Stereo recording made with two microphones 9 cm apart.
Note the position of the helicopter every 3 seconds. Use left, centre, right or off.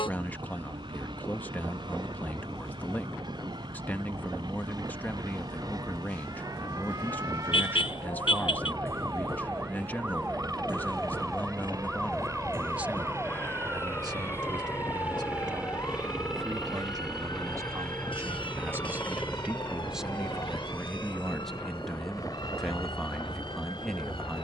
right, right, right, right, right, centre, left, left.